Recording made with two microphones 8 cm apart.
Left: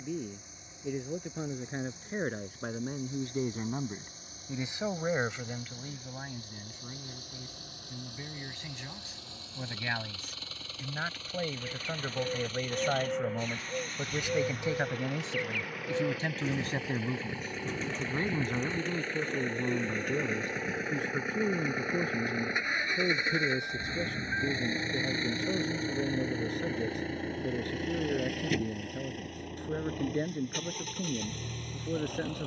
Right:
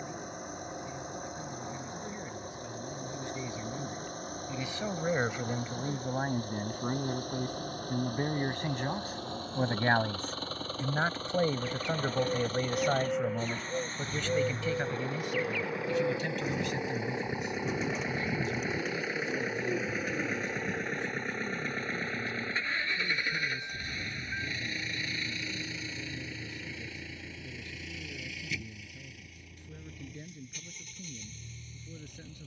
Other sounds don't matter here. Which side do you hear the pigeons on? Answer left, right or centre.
centre.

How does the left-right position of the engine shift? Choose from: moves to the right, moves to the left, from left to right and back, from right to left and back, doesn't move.
moves to the left.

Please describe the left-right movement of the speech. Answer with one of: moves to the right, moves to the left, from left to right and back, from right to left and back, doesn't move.
from left to right and back.